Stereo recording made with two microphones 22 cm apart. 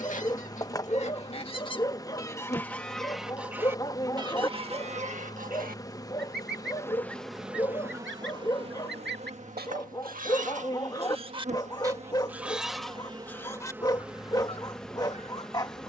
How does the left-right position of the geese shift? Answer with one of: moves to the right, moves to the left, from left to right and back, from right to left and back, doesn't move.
from left to right and back.